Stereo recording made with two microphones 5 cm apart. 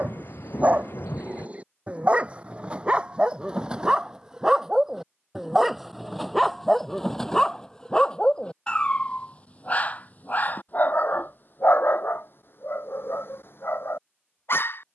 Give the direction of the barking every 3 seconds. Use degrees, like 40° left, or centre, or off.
30° right, 10° right, 10° left, 40° left, 60° left.